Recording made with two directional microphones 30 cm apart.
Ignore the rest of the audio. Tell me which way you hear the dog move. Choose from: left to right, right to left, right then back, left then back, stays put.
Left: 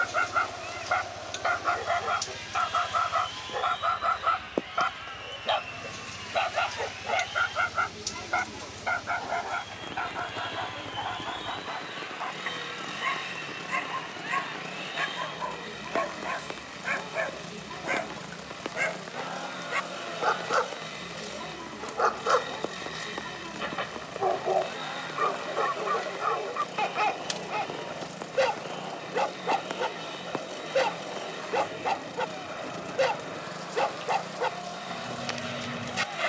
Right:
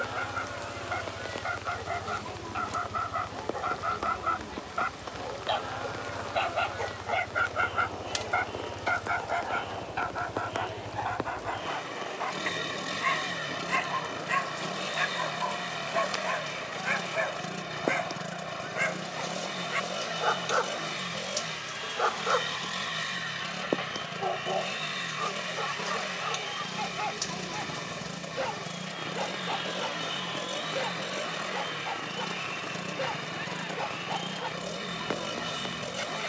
right then back.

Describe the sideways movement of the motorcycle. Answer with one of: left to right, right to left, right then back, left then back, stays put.
stays put.